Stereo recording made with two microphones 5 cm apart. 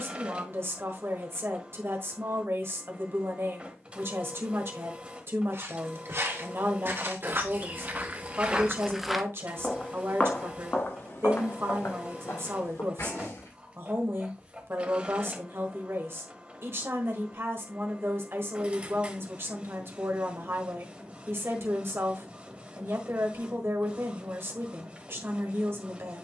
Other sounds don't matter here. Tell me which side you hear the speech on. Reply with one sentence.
You can hear the speech on the right.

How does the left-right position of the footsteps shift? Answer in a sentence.
You can hear the footsteps travel towards the left.